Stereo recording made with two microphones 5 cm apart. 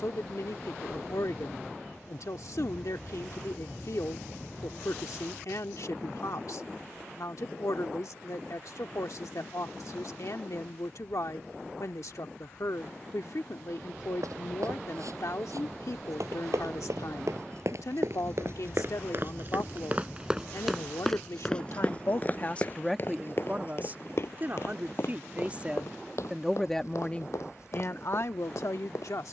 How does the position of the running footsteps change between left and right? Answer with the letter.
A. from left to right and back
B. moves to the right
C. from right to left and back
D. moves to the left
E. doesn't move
D.